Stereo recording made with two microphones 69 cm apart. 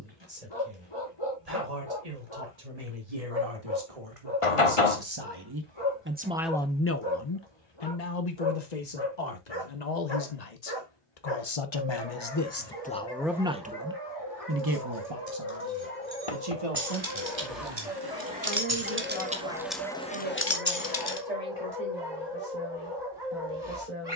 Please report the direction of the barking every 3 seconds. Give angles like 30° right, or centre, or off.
40° left, 40° left, 40° left, 40° left, 30° left, 10° left, 20° right, 30° right.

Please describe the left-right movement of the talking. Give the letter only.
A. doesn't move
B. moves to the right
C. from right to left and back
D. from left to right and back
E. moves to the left
C.